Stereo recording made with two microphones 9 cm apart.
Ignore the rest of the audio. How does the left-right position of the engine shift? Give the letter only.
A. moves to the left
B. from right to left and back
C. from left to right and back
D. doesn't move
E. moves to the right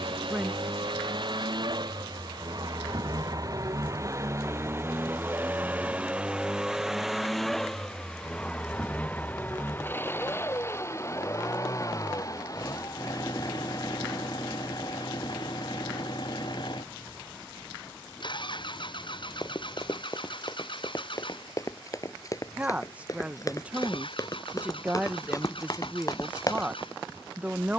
A.